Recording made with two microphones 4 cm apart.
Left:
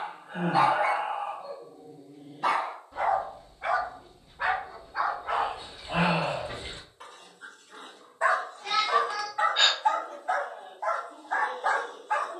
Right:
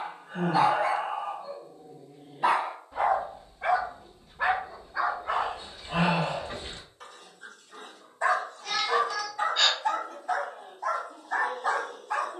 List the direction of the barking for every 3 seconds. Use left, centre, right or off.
centre, centre, left, left.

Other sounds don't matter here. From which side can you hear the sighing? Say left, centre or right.
left.